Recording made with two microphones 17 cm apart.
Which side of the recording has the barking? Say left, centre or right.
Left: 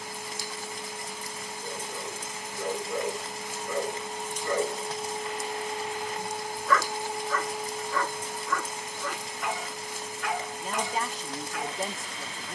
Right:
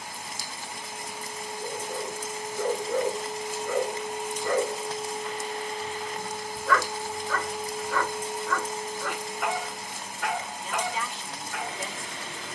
right.